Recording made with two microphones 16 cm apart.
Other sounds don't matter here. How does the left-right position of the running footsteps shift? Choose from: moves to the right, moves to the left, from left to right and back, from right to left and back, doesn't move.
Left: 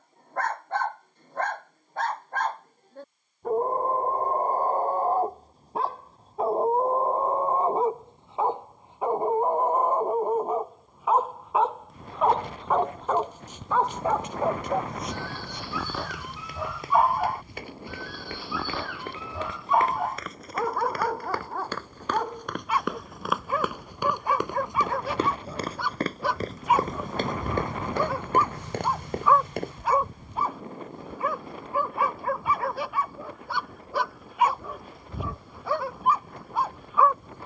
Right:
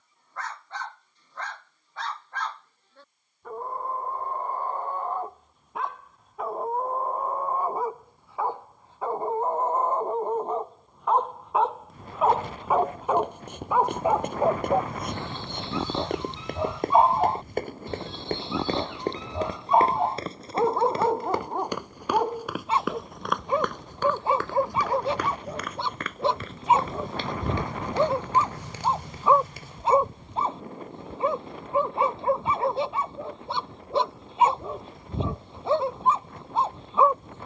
moves to the left.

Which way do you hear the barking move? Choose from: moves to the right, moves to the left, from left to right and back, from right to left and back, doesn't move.
moves to the right.